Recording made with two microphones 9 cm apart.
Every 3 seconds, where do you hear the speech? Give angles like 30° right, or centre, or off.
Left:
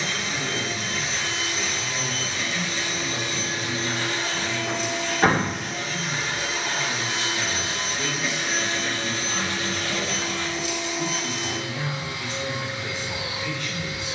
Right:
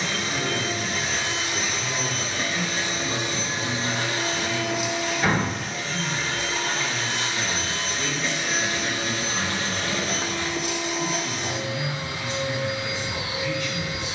50° right, 30° right, centre, 30° left, 50° left.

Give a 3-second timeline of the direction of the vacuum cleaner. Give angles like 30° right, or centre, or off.
50° right, 10° right, 10° left, 40° right, 50° right.